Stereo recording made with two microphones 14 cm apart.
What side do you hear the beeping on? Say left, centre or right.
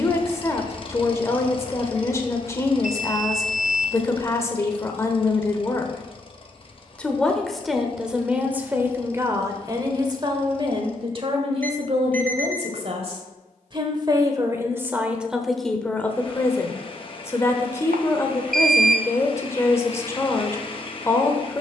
right.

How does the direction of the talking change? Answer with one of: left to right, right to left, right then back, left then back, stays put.
right then back.